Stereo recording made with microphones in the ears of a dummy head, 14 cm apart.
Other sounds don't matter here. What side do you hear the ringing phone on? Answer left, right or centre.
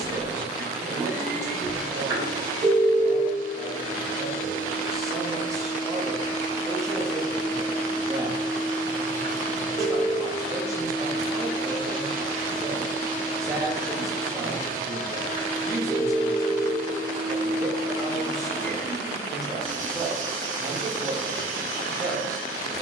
right.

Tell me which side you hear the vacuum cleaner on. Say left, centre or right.
right.